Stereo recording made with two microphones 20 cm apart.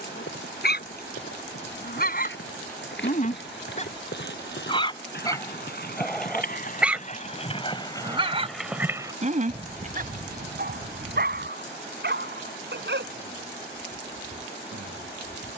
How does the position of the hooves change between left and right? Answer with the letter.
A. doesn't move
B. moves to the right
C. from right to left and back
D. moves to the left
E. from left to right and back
B.